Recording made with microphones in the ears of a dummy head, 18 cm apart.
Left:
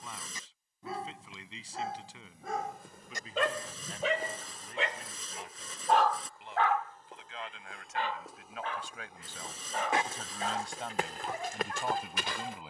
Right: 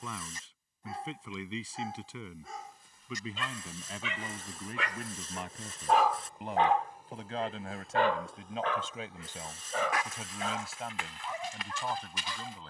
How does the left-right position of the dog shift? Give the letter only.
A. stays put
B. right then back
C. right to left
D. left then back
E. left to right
E.